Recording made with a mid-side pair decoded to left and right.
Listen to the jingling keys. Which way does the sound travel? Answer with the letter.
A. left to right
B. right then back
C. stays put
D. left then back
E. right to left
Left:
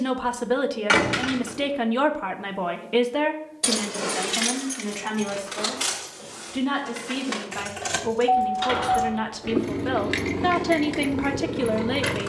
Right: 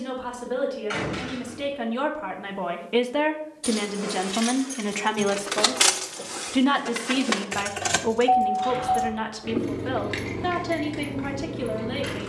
B.